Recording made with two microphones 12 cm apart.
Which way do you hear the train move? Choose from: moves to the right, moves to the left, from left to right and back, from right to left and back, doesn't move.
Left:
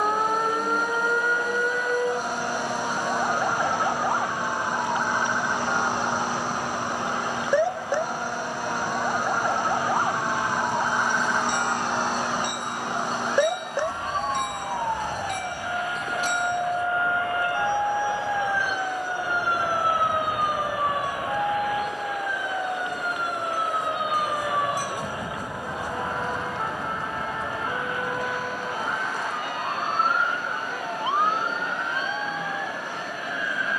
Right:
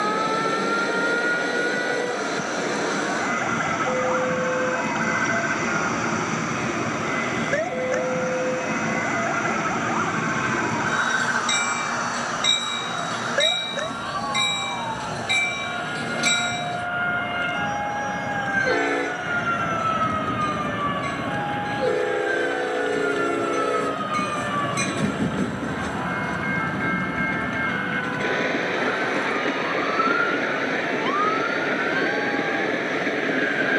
doesn't move.